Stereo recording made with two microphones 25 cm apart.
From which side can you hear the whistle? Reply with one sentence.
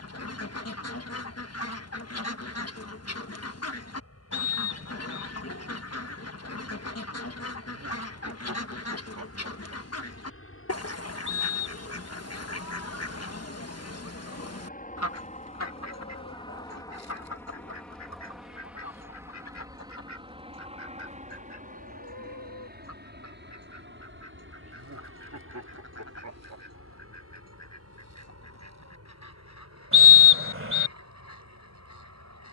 In this clip you hear the whistle on the right.